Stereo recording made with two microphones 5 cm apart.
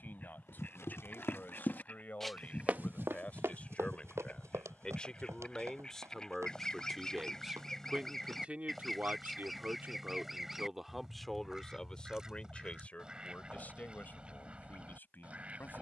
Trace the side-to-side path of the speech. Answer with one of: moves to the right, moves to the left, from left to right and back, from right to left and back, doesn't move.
from left to right and back.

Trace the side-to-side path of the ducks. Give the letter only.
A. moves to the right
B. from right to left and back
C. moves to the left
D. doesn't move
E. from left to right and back
A.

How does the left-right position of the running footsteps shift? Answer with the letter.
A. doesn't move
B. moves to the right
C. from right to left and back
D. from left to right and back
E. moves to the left
B.